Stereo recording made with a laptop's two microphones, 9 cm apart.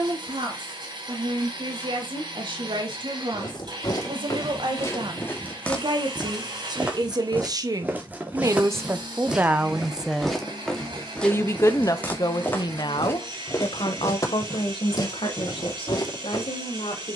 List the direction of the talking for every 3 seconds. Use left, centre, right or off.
right, right, right, centre, left, left.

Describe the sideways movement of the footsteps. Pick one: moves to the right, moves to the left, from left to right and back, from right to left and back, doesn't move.
from left to right and back.